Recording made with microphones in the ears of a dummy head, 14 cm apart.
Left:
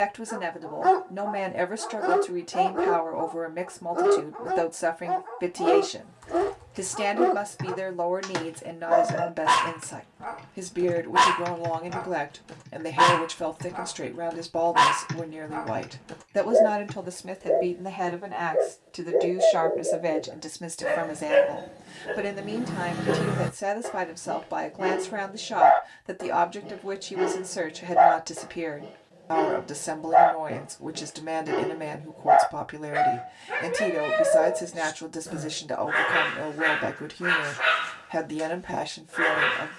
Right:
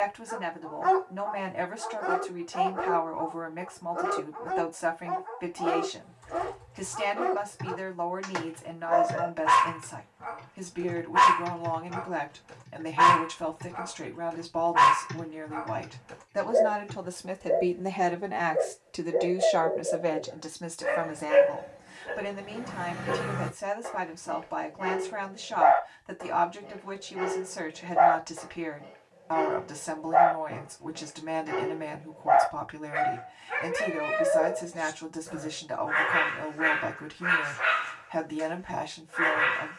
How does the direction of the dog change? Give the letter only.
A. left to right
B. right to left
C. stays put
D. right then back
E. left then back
C.